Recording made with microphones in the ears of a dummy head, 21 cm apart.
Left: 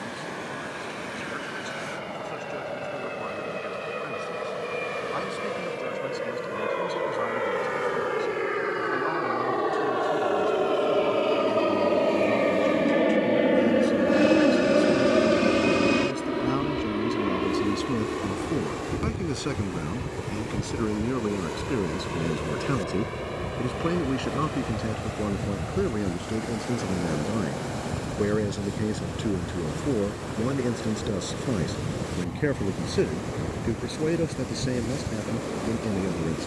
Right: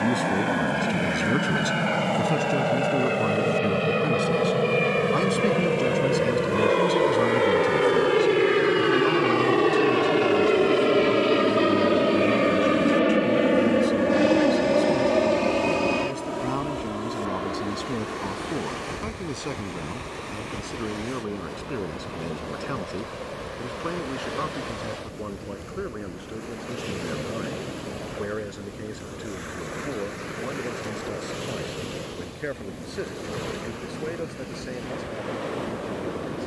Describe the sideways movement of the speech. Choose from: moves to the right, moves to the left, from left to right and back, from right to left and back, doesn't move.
moves to the left.